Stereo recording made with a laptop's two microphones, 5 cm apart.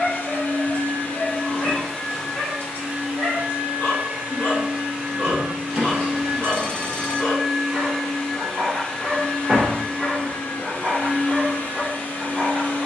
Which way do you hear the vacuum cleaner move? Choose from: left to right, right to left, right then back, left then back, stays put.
right then back.